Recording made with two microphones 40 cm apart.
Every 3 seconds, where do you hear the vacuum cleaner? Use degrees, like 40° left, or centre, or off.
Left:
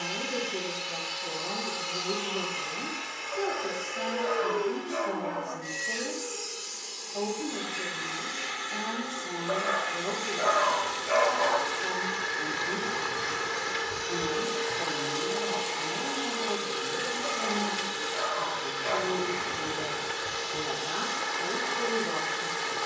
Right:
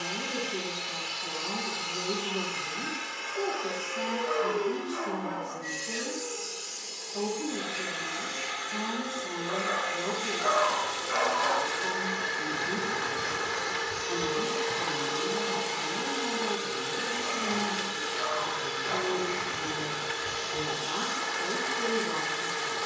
40° right, 10° right, 20° left, 40° left, centre, 40° right, 50° right, 50° right.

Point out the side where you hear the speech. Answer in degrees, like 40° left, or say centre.
10° right.